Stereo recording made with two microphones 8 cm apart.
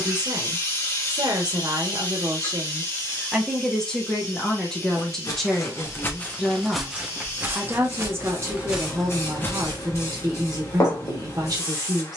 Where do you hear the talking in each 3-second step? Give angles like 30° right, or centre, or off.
50° right, 10° left, 20° right, 50° right.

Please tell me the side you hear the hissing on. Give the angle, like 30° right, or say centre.
40° left.